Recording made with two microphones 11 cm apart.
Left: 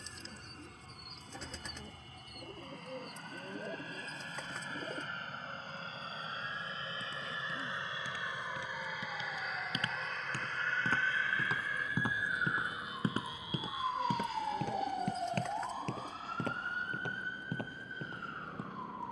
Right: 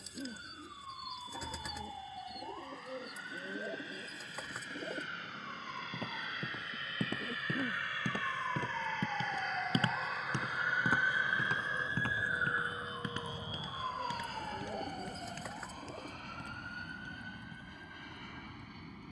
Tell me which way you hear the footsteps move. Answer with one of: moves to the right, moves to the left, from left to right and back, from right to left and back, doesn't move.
moves to the left.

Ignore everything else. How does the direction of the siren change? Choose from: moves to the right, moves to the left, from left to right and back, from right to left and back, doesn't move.
moves to the left.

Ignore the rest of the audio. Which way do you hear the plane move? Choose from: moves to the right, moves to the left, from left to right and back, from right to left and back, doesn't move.
moves to the right.